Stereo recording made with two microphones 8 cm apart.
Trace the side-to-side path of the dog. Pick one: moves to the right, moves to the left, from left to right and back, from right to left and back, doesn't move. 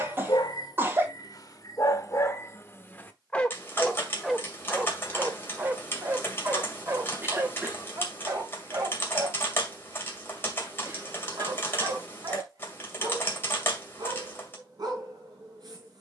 moves to the right.